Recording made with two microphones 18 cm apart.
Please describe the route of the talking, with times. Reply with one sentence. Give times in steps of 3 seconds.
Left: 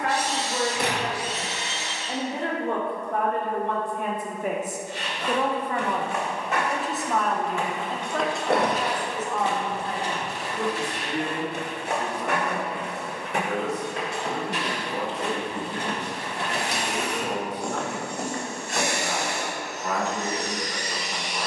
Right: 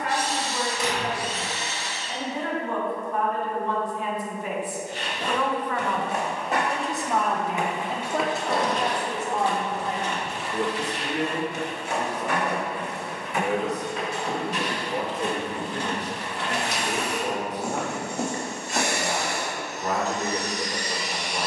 In this clip you hear the talking on the left from 0 s, in the centre from 6 s and on the right from 9 s.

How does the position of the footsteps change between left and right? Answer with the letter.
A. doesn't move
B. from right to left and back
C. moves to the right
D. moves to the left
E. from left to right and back
B.